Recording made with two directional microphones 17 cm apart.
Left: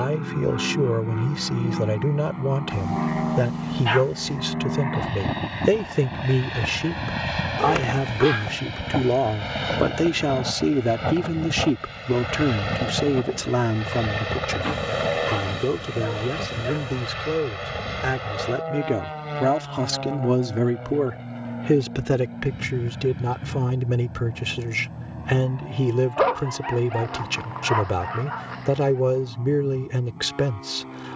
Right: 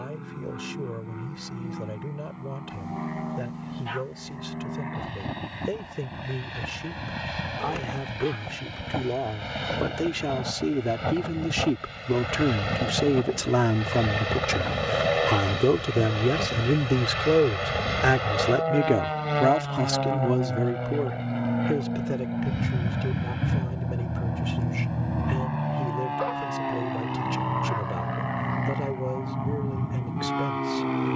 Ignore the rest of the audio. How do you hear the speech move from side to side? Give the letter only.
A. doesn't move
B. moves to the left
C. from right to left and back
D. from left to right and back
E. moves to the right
D.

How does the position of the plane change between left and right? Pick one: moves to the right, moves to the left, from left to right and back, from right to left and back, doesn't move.
moves to the right.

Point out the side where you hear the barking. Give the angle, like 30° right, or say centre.
60° left.